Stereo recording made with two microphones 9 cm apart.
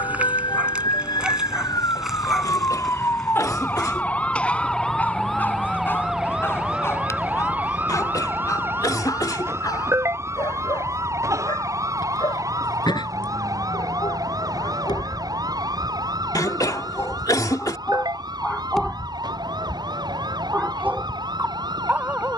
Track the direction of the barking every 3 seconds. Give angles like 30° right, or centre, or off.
10° right, 10° left, 30° left, 50° left, 50° left, 30° left, centre, 20° right.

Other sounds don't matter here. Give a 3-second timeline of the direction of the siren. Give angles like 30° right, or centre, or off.
50° left, 10° left, 20° right, 30° right, 40° right, 40° right, 50° right, 50° right.